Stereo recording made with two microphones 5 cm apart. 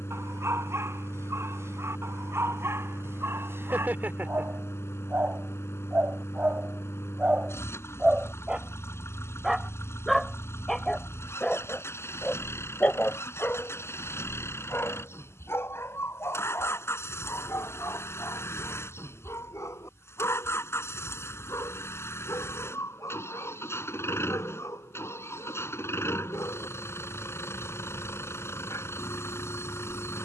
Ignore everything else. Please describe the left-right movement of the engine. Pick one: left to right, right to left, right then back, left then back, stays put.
stays put.